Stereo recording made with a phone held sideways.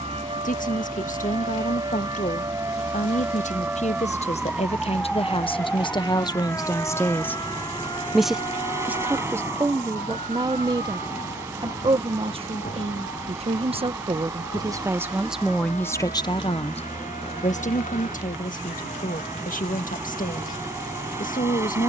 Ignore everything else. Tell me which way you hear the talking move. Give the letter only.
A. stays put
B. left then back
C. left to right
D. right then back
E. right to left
D.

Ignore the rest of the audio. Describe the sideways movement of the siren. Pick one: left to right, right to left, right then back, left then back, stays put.
right to left.